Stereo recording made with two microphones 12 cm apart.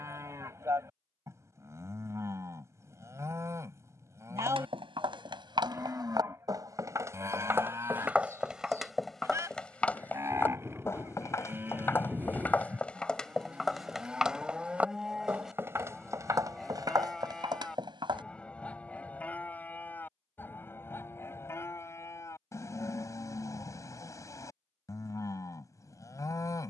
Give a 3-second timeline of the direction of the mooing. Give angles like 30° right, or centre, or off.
20° right, 20° right, 20° right, 20° right, 10° right, centre, 10° left, 20° left, 30° left.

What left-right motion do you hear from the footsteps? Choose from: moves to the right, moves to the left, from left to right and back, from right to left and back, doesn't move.
from right to left and back.